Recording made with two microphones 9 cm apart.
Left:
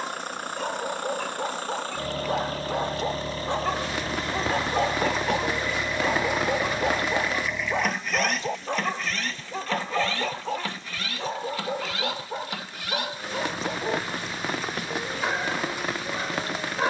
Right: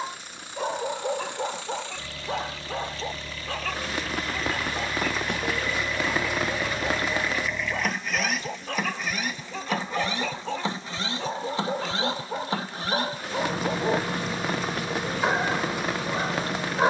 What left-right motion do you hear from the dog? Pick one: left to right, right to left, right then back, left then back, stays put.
left then back.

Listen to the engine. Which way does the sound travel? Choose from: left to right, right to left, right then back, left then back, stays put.
left to right.